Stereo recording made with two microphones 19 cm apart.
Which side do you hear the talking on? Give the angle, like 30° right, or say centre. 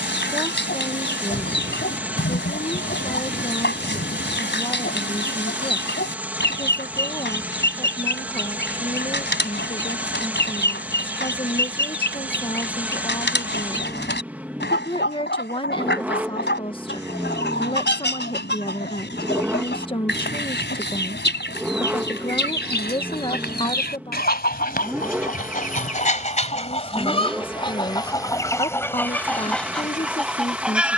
30° left.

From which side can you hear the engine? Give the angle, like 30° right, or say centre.
10° right.